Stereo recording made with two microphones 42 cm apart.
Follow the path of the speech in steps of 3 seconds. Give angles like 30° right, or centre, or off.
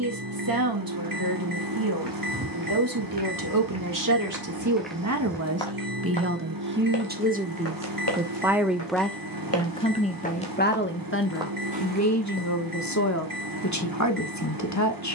50° right, 40° right, 20° right, 20° left, 40° left.